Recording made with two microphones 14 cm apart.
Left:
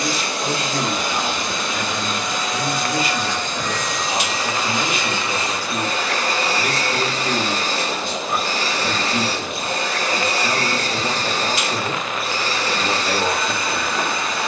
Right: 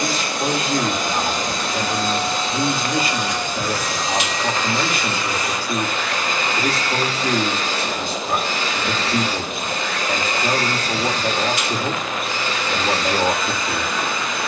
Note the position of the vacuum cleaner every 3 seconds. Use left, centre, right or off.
right, centre, left, left, left.